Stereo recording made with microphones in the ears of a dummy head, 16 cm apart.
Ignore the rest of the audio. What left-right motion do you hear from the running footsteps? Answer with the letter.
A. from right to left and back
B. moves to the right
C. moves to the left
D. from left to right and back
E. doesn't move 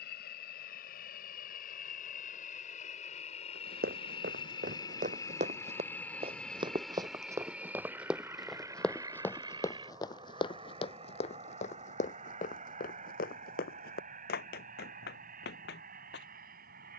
C.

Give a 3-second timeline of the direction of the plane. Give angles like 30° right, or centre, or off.
50° left, 30° left, 10° right, 30° right, 40° right, 50° right.